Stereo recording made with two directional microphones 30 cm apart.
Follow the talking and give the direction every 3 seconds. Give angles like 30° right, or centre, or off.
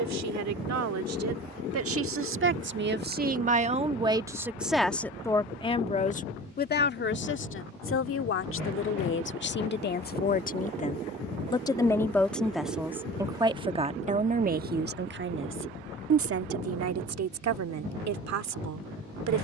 50° right, 10° right, 40° left, 30° left, 10° right, 50° right, 60° right.